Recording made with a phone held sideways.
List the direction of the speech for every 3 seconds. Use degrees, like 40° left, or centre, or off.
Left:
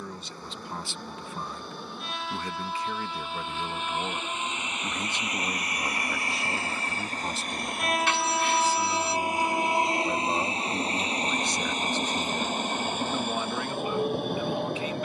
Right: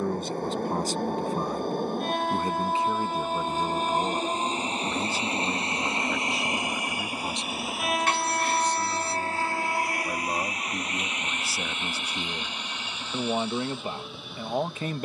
40° right, 10° right, centre, centre, 30° right.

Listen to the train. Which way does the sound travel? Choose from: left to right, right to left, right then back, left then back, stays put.
right to left.